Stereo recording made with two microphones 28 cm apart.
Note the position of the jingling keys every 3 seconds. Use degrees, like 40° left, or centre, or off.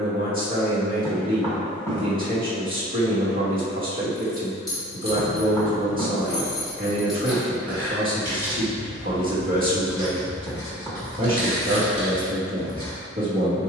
off, 10° left, centre, 20° right, 20° right.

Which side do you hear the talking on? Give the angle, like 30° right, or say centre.
30° right.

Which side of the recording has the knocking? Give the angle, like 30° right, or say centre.
10° left.